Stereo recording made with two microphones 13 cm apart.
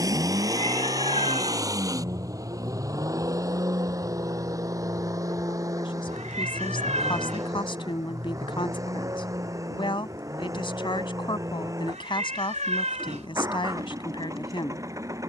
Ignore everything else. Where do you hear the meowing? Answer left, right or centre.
right.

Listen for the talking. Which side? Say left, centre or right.
left.